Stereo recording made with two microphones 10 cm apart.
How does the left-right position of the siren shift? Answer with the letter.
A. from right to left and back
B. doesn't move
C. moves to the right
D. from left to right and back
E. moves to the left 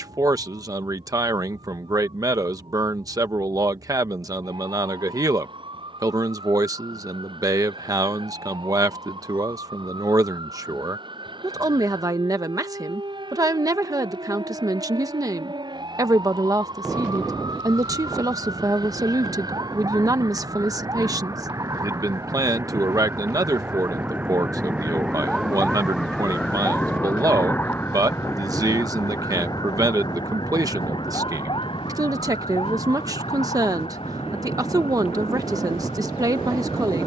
E.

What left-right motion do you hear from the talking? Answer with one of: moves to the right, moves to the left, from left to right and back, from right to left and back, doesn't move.
doesn't move.